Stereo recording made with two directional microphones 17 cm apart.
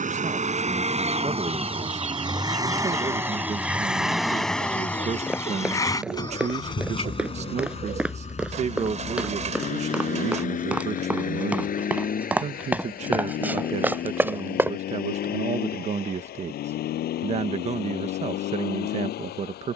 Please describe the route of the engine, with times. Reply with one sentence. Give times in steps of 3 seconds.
In this clip you hear the engine on the right from 0 s, in the centre from 3 s and on the left from 6 s.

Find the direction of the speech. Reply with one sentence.
In this clip you hear the speech on the right.